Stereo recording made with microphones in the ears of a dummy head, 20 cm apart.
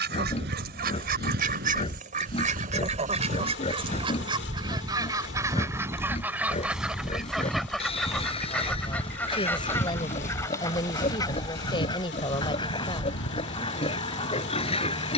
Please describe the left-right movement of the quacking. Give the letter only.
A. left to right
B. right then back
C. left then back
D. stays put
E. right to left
E.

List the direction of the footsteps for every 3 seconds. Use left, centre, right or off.
right, right, centre, left, left.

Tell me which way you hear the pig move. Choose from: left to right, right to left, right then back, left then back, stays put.
stays put.